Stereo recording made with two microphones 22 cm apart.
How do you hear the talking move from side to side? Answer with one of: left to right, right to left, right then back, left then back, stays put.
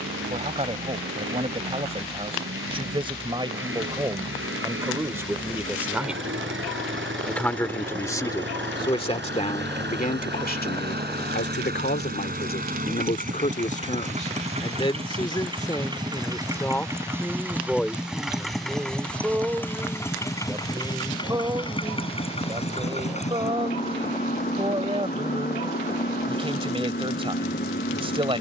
left then back.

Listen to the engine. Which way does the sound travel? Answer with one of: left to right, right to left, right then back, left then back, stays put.
right to left.